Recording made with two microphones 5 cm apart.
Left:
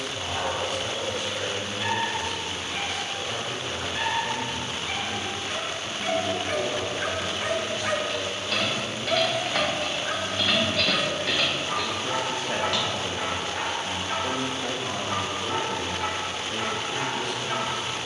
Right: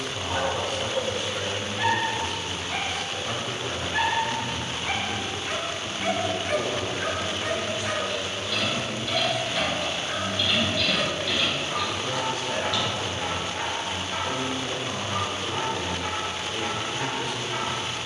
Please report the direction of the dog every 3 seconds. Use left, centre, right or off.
right, right, centre, left, left, left.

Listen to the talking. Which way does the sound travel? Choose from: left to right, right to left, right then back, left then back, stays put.
right to left.